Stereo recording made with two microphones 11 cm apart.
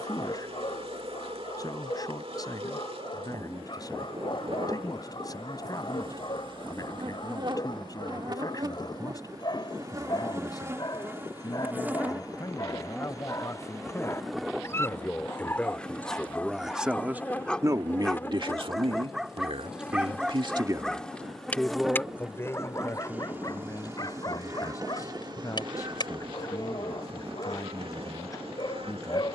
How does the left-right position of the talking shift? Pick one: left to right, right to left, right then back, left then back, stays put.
right then back.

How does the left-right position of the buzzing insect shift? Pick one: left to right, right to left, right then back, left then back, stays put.
left then back.